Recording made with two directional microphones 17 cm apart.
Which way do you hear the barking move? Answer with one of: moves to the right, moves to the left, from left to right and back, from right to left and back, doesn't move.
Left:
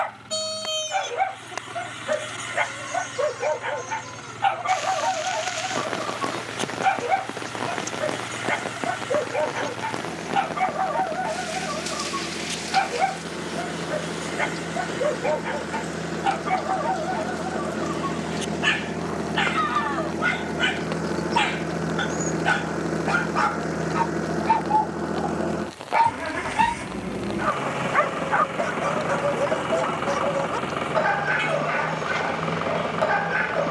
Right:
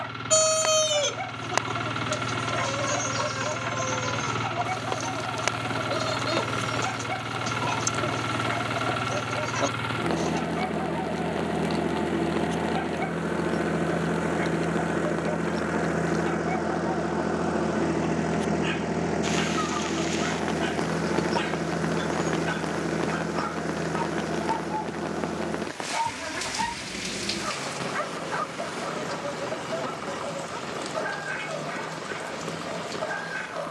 doesn't move.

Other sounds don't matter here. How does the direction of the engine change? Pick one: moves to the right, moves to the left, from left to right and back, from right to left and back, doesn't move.
moves to the left.